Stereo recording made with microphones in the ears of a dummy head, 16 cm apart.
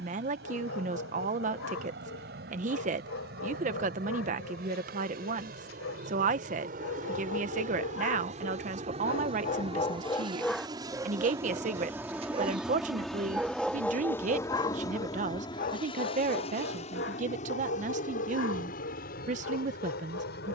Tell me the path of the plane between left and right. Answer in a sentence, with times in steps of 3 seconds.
You can hear the plane on the right from 0 s, in the centre from 12 s and on the left from 15 s.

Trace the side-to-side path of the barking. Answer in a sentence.
You can hear the barking go right and come back.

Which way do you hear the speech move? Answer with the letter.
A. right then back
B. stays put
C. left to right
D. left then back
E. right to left
B.